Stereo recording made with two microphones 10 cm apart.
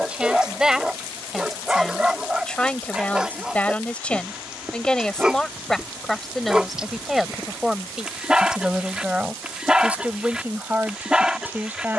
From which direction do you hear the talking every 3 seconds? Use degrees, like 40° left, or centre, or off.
centre, 10° left, centre, 20° right.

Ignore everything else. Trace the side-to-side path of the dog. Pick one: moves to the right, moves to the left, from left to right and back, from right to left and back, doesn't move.
doesn't move.